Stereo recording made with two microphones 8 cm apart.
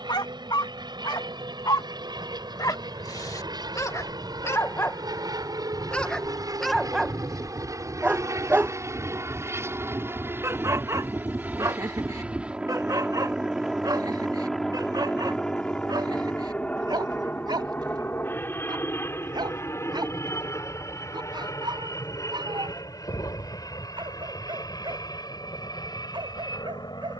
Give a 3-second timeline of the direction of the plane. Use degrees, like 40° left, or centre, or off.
70° right, 60° right, 40° right, 30° right, 10° right, 10° left, 30° left, 40° left, 50° left.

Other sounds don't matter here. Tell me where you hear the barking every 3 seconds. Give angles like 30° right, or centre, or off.
60° left, 30° left, centre, 40° right, 50° right, 60° right, 60° right, 70° right, 70° right.